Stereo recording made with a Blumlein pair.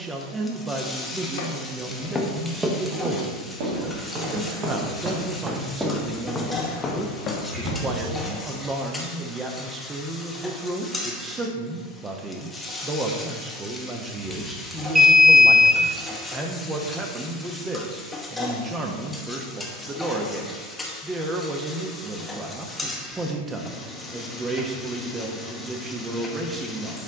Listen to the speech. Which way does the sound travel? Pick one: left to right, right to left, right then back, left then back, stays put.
stays put.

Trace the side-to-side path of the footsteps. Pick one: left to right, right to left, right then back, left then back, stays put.
right then back.